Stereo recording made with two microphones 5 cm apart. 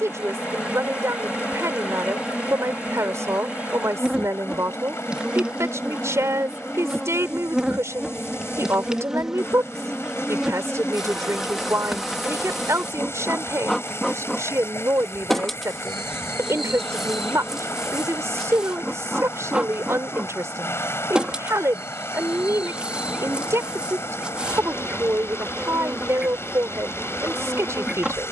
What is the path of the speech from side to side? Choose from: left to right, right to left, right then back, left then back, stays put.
stays put.